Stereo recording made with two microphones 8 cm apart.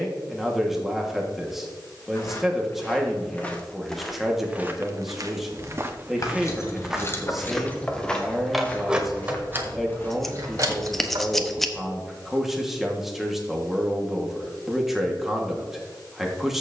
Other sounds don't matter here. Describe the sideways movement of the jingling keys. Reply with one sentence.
In this clip you hear the jingling keys move from left to right.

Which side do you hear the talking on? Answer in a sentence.
In this clip you hear the talking in the centre.